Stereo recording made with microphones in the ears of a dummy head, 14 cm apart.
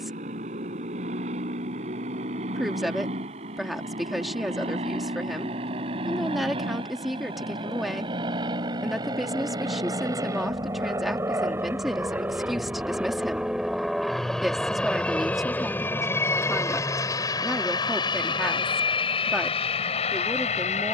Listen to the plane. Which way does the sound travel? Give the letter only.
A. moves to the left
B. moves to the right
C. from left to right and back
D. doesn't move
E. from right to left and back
A.